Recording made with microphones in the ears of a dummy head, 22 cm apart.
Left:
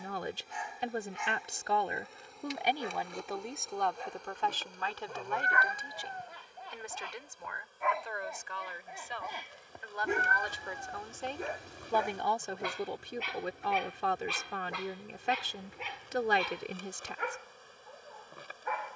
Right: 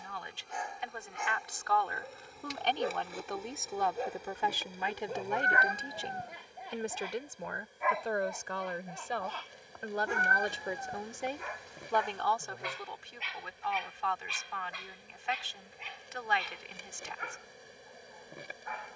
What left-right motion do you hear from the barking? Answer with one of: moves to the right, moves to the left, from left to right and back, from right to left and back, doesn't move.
moves to the left.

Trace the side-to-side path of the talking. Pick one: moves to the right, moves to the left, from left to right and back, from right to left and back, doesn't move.
from left to right and back.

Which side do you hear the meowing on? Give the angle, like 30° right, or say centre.
30° right.